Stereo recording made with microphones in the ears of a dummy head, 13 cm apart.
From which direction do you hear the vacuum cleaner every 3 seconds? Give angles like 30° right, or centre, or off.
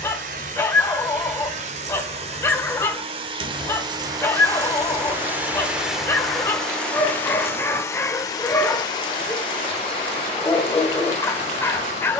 50° right, 20° right, 20° left, 40° left.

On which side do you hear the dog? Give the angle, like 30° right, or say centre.
20° left.